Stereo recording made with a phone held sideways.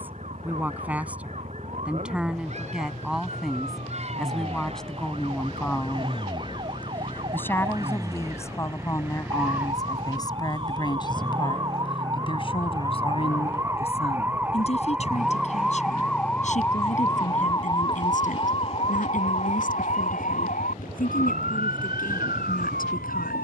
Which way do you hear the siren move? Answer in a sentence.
In this clip you hear the siren go from the right side to the left.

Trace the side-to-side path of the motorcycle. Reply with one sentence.
In this clip you hear the motorcycle move to the left.